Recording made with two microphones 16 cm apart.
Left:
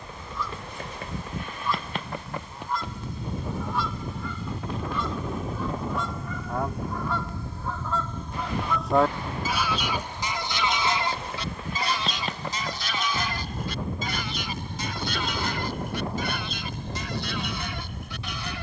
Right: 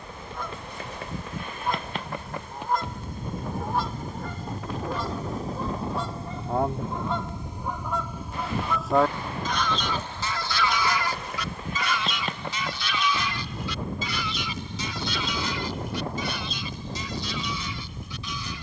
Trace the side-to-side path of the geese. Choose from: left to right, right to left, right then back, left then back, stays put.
right to left.